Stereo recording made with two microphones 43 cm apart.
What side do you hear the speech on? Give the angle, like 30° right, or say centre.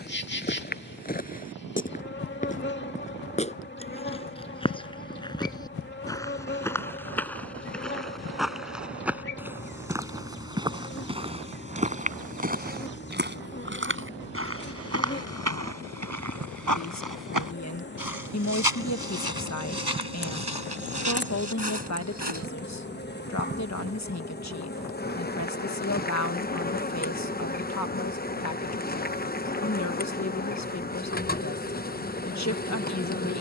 40° left.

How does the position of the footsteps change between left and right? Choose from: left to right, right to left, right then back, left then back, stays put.
left to right.